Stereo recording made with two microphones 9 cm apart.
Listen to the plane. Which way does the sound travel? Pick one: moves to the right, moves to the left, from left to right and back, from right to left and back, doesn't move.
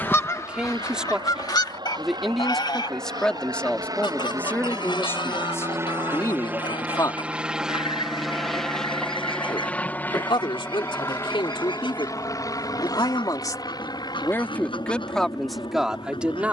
moves to the left.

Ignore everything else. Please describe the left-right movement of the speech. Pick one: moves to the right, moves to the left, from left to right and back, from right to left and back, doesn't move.
from right to left and back.